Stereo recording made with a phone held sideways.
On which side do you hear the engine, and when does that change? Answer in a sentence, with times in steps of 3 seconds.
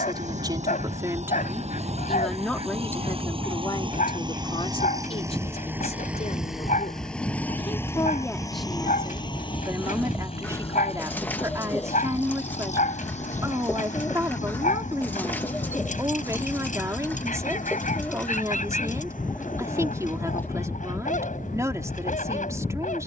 In this clip you hear the engine on the right from 0 s, in the centre from 6 s and on the left from 9 s.